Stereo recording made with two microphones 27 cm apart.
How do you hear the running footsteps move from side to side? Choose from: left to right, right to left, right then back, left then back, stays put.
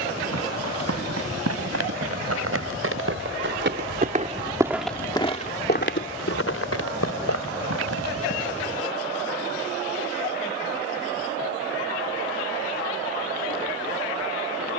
right to left.